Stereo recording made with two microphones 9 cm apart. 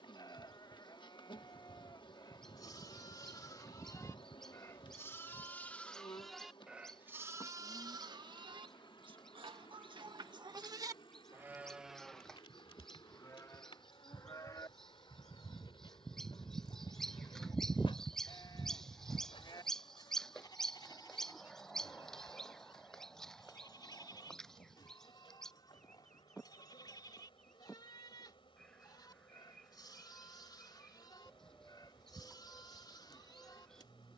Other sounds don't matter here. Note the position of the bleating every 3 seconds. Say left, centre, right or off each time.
left, left, right, right, left, left, left, left, left, left, left, left.